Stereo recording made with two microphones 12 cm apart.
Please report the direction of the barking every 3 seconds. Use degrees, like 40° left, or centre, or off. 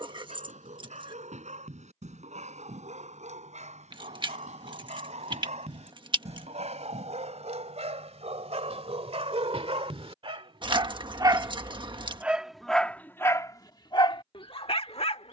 80° right, 70° right, 70° right, 50° right, 20° left.